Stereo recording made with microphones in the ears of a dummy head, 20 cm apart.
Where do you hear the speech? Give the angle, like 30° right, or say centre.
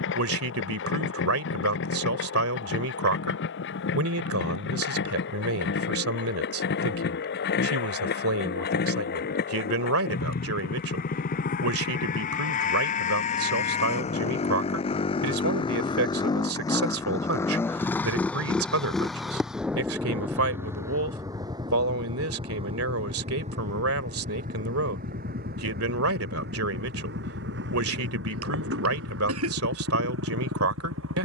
70° right.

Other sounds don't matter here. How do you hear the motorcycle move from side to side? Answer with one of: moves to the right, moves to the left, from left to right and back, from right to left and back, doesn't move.
moves to the right.